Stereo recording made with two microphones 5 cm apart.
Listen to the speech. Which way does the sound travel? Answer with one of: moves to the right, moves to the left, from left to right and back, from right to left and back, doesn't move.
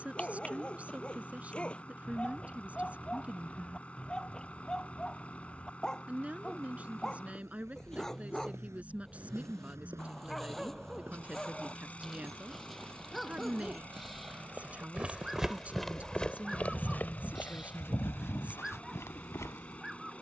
doesn't move.